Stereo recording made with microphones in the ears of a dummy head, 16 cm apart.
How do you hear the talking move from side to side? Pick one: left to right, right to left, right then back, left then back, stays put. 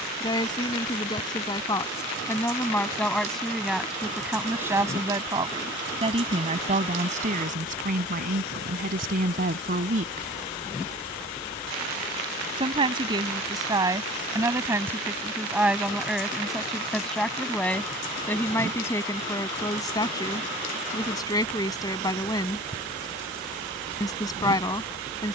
right then back.